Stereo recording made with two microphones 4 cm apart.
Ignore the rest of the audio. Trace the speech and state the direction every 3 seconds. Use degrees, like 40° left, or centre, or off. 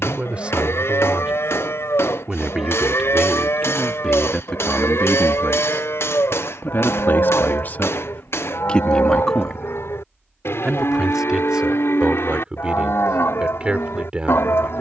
20° right, 20° left, 50° left, centre, 20° right.